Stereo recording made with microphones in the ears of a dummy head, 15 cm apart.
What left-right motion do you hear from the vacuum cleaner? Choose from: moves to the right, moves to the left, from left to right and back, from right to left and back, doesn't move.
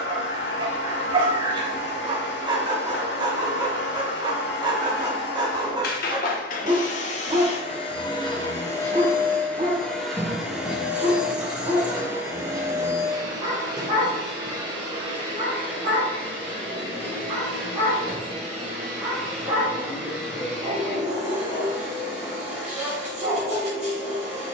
moves to the right.